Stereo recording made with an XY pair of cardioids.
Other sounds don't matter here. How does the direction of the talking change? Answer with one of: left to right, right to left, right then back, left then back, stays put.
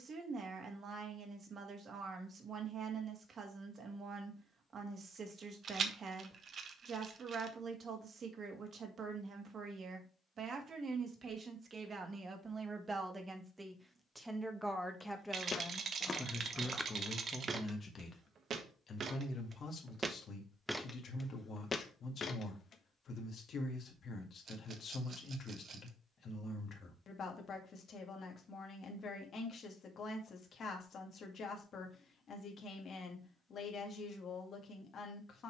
right to left.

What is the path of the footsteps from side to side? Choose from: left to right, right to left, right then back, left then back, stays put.
right then back.